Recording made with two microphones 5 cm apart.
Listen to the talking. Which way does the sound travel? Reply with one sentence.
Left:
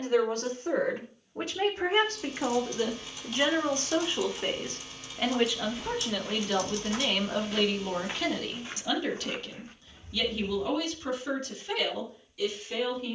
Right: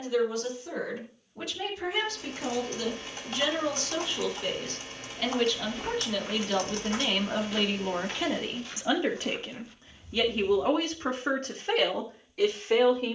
In this clip you hear the talking move from left to right.